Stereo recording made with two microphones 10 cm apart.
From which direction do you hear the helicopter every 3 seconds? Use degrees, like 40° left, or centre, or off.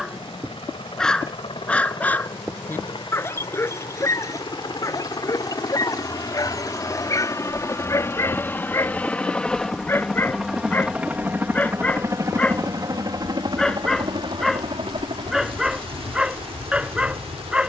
60° left, 50° left, 30° left, centre, 40° right, 60° right.